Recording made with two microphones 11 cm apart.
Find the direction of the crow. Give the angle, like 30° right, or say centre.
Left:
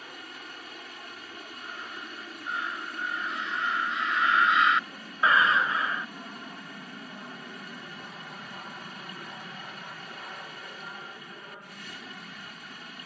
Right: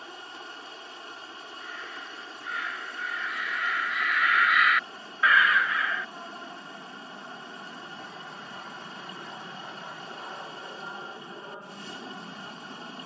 30° left.